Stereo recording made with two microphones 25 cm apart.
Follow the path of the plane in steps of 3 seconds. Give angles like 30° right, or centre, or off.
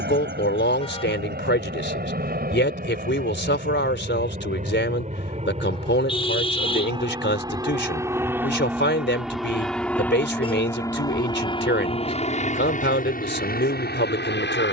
40° right, 30° right, 20° right, 10° left, 40° left.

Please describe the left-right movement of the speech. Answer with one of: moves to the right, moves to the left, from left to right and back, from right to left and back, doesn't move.
doesn't move.